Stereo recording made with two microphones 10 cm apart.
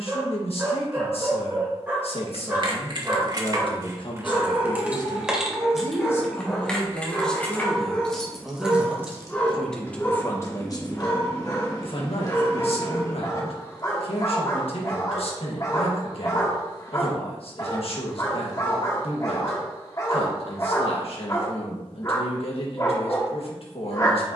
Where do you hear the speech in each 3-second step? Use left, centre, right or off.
left, left, centre, left, left, left, left, left.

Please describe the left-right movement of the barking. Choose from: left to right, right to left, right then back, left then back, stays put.
right to left.